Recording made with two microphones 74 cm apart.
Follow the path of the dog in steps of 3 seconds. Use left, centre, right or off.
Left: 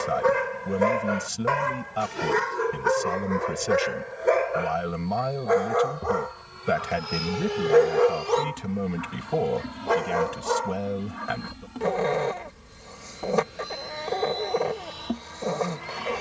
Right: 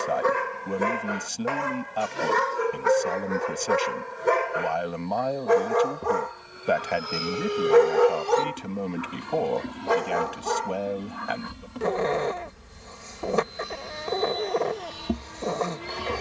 centre, right, right, centre, left, left.